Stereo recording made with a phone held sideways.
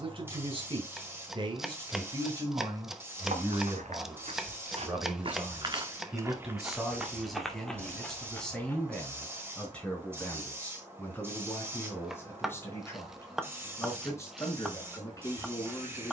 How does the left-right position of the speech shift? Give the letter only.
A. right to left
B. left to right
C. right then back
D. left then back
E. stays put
A.